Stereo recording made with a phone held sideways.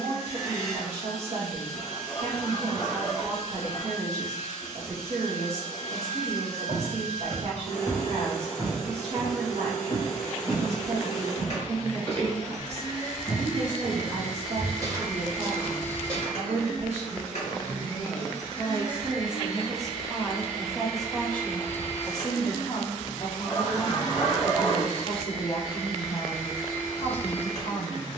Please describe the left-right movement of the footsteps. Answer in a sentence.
In this clip you hear the footsteps move from right to left and back again.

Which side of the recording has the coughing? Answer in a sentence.
You can hear the coughing on the left.